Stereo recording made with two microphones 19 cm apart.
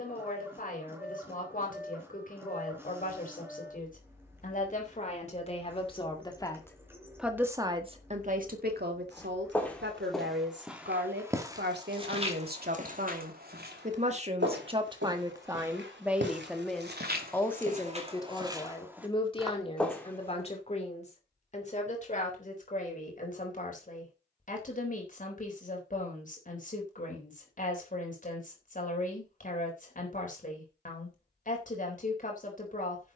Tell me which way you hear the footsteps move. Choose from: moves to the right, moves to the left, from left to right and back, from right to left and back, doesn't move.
from left to right and back.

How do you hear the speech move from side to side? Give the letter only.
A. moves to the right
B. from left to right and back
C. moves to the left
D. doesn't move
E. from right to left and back
B.